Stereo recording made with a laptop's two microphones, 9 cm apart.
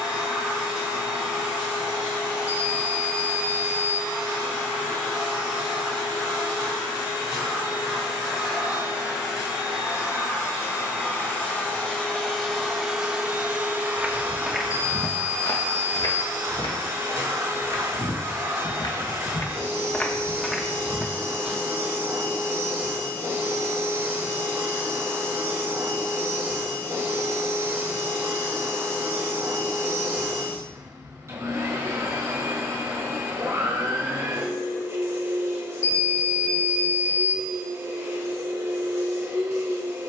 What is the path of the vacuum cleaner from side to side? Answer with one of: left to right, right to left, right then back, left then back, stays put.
left to right.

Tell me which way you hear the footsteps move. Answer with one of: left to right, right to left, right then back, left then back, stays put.
left then back.